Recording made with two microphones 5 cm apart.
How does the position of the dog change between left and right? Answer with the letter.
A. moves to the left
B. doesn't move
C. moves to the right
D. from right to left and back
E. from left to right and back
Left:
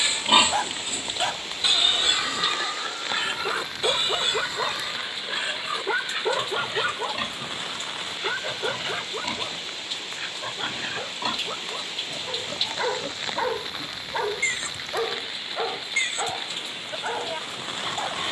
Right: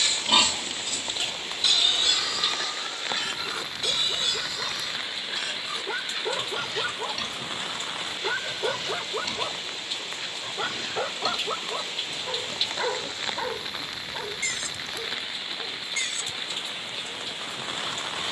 E.